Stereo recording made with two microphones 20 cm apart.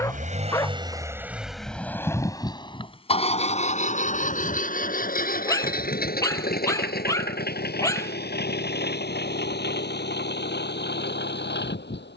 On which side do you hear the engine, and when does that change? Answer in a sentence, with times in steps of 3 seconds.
In this clip you hear the engine in the centre from 0 s and on the left from 3 s.